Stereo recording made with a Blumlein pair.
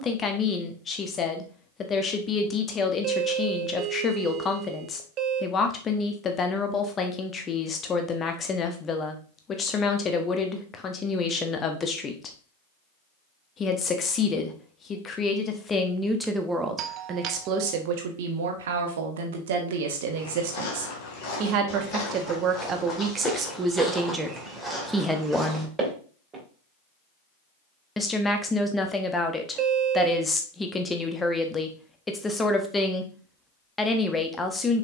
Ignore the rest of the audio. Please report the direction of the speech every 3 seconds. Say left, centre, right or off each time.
left, left, left, left, left, centre, right, right, centre, centre, centre, centre.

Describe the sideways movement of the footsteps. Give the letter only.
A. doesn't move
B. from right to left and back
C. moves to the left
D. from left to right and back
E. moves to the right
E.